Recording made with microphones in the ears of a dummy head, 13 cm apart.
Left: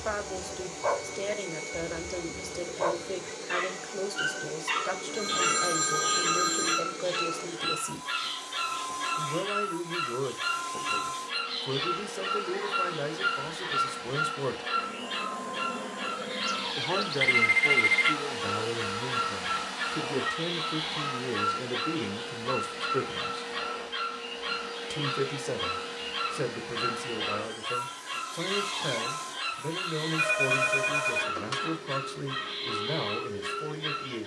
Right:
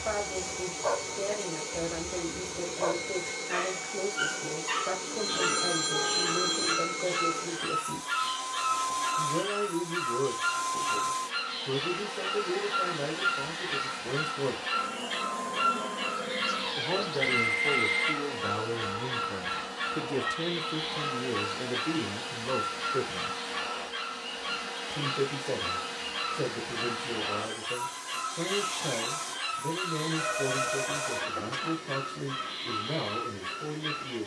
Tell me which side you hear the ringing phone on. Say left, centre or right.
left.